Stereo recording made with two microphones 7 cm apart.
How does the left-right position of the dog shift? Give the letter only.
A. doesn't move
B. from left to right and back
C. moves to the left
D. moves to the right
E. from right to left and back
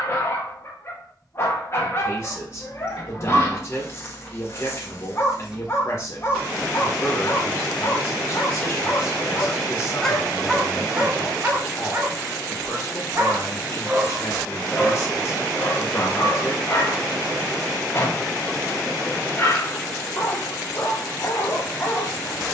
B.